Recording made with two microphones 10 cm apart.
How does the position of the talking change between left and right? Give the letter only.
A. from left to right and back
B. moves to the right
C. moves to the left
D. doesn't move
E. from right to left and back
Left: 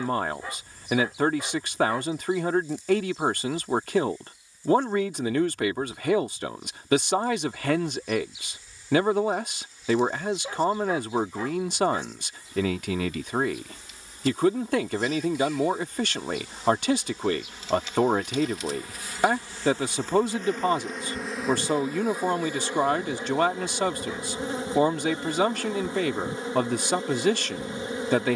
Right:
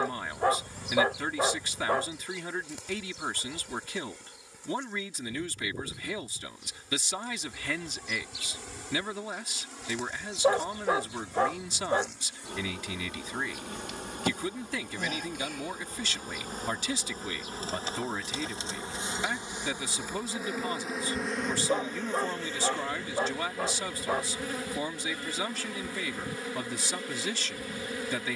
D.